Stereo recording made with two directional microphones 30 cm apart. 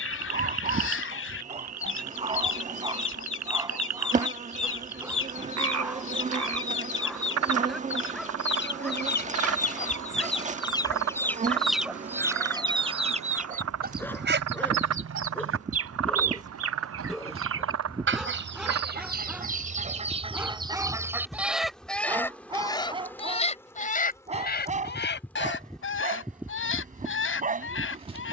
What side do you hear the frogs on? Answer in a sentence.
You can hear the frogs on the right.